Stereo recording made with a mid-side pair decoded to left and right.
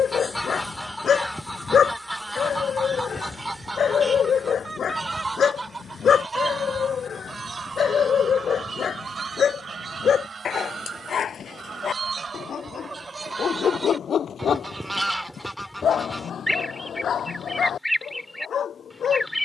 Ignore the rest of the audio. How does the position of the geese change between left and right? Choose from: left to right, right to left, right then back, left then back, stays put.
right then back.